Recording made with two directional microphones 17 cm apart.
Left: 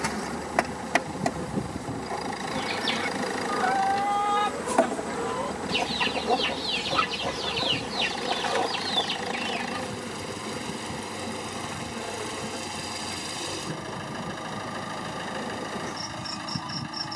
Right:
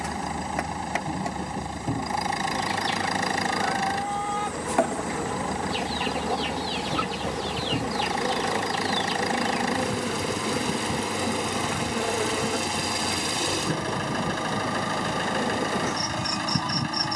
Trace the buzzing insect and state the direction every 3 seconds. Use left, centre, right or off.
left, centre, right, right, right, right.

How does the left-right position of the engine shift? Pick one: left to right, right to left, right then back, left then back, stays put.
stays put.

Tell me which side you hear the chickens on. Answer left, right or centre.
left.